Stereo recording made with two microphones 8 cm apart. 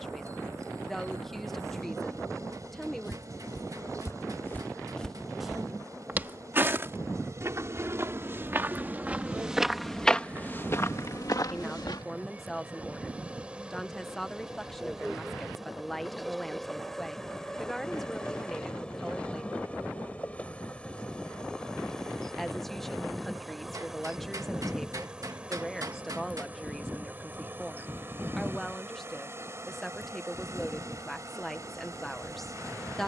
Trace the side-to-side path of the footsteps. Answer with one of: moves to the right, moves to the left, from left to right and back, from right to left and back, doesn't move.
from left to right and back.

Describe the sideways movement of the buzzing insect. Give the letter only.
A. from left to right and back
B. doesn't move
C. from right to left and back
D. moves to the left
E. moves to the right
C.